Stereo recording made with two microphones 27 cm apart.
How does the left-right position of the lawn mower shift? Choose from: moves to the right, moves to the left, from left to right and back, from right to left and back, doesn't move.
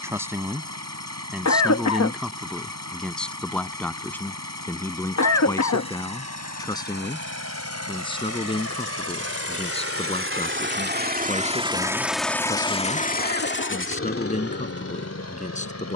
moves to the left.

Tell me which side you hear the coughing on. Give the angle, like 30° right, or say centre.
70° left.